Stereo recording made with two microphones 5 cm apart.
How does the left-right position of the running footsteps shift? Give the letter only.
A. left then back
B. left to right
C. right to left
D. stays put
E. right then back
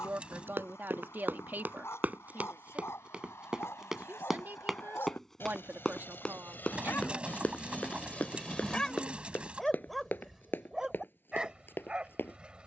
C.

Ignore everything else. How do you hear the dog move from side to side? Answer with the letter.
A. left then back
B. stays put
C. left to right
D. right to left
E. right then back
C.